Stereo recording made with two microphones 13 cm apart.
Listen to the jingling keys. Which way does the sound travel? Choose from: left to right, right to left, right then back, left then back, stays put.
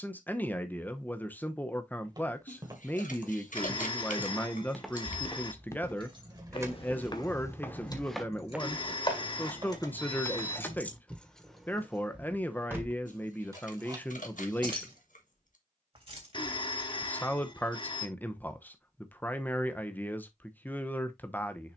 left then back.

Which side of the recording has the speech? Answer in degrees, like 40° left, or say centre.
10° left.